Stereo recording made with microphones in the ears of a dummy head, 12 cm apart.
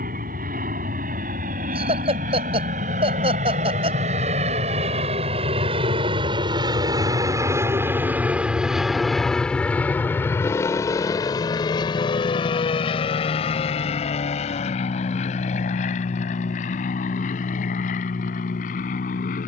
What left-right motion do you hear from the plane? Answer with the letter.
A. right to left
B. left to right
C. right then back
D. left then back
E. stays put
A.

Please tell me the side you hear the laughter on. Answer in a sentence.
In this clip you hear the laughter on the right.